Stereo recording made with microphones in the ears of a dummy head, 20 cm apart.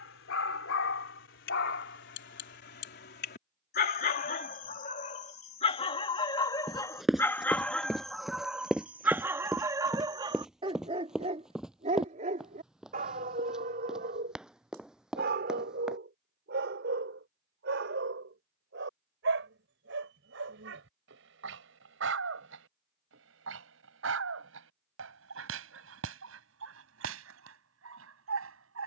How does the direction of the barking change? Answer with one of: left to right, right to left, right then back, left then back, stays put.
left to right.